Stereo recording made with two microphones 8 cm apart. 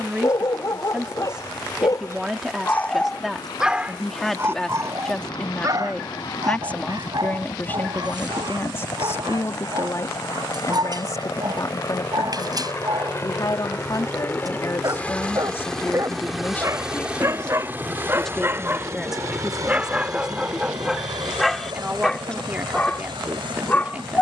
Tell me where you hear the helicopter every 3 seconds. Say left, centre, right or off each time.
left, left, left, left, left, centre, right, right.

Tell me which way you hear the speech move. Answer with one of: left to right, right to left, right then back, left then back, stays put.
left then back.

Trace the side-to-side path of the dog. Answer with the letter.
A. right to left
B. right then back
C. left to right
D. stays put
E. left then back
B.